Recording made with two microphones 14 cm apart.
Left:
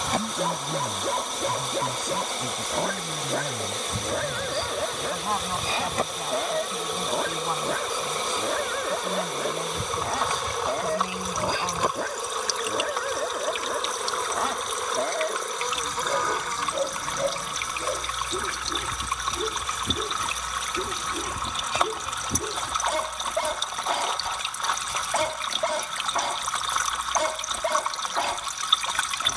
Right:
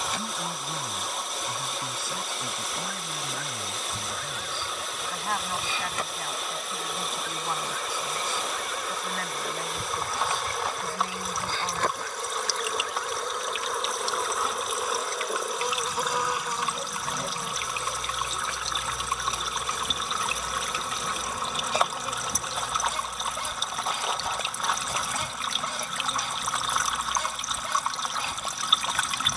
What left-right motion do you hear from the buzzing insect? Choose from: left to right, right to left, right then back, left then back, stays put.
left to right.